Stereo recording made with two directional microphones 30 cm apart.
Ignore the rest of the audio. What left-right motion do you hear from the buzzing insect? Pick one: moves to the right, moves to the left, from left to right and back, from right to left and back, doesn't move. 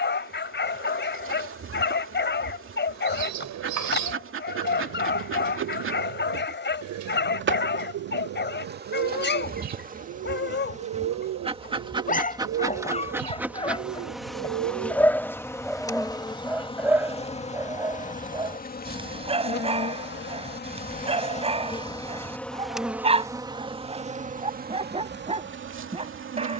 from right to left and back.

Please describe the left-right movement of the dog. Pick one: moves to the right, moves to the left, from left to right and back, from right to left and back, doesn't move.
moves to the right.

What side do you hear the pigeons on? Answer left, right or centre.
right.